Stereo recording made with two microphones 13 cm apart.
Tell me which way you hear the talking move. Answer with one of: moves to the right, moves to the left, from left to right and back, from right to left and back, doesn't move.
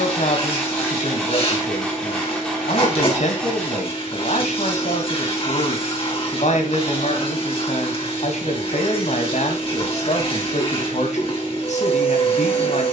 doesn't move.